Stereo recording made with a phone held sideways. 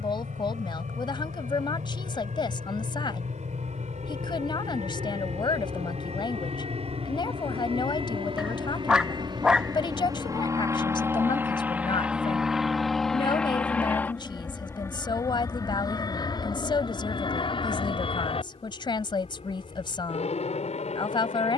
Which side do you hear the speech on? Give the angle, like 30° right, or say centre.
40° left.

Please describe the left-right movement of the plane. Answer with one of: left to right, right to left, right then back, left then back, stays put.
right to left.